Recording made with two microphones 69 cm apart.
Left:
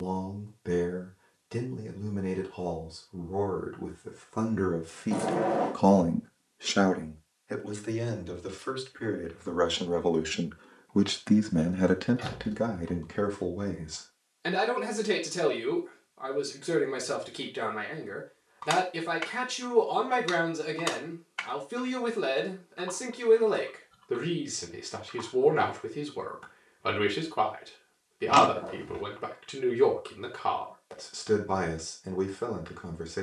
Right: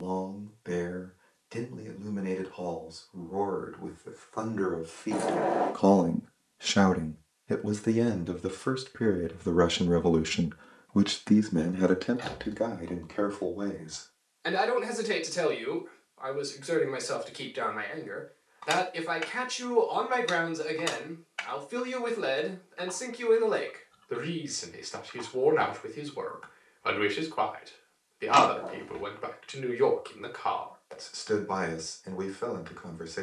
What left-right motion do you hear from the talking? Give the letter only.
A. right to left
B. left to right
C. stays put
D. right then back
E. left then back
D.